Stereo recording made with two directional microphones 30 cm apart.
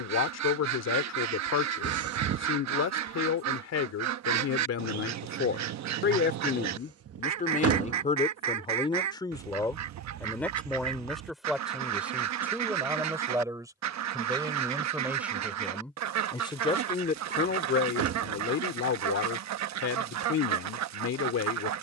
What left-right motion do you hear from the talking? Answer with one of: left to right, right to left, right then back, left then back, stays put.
right then back.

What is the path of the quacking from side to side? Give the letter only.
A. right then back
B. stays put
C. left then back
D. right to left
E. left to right
B.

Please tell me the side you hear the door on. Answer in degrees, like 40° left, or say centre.
50° right.